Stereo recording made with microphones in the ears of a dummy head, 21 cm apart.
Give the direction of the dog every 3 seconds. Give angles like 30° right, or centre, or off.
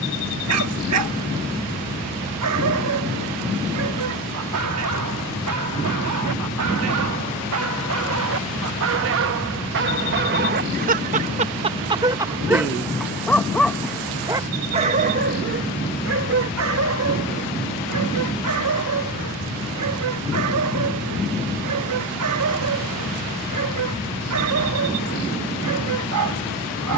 70° right, 70° right, 70° right, 40° right, 10° right, 60° right, 70° right, 70° right, 70° right.